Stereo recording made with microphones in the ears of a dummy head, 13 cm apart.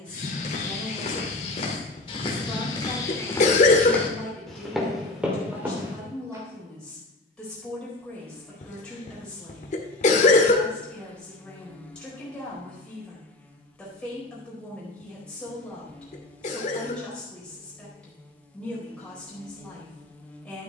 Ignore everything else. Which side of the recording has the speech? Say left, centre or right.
centre.